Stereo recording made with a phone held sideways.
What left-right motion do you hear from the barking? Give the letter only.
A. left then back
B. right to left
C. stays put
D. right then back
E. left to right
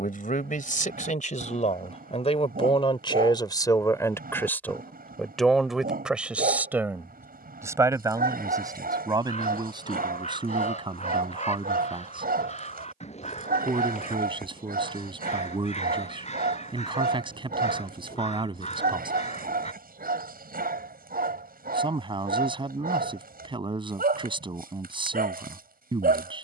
C.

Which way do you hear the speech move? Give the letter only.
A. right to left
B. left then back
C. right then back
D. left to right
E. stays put
D.